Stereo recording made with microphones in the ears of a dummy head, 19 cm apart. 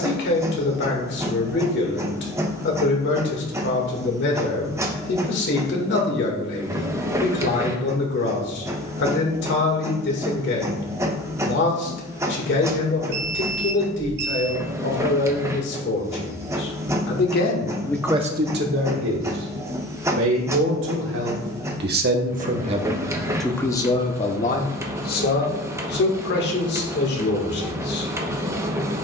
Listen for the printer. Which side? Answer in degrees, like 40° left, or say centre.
10° right.